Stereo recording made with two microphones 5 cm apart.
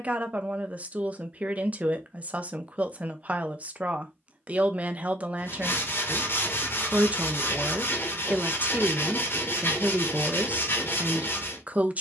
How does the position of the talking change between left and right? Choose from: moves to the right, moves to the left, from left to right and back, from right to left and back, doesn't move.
doesn't move.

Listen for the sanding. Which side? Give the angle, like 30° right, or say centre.
60° left.